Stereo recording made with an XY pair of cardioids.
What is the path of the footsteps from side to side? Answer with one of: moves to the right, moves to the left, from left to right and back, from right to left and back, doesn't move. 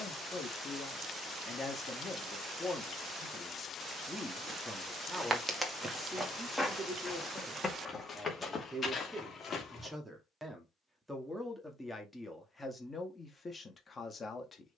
moves to the left.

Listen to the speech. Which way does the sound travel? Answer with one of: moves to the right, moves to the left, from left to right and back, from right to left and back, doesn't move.
from left to right and back.